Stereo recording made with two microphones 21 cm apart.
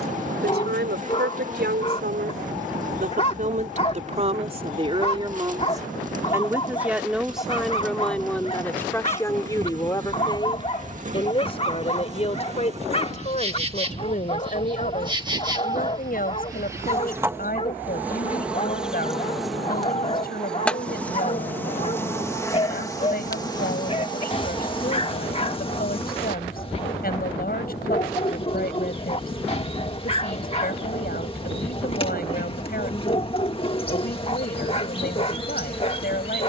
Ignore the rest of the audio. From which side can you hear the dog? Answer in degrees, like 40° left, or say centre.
30° left.